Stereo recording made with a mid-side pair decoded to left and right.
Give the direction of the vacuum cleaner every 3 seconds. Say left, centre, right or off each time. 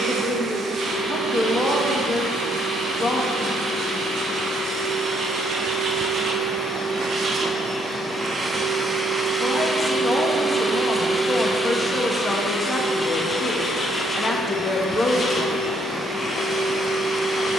right, right, right, centre, left, left.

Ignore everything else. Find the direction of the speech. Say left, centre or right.
left.